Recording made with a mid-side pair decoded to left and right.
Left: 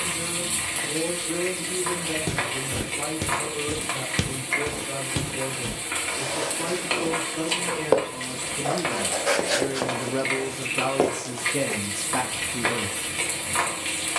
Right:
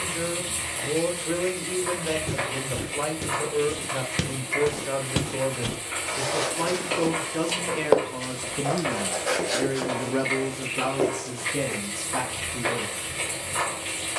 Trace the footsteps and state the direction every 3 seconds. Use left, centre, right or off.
left, centre, right, left, off.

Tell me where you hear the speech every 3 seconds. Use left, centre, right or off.
right, right, right, centre, left.